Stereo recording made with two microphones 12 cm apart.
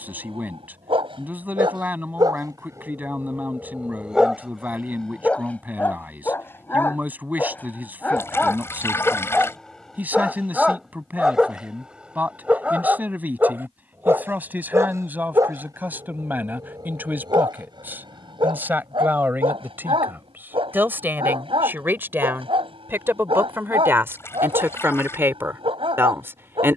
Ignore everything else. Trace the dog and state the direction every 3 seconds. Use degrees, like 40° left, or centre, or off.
40° right, 10° right, 10° left, centre, 20° right, 40° right, 50° right, 50° right, 50° right.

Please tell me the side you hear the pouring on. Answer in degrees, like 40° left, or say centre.
20° left.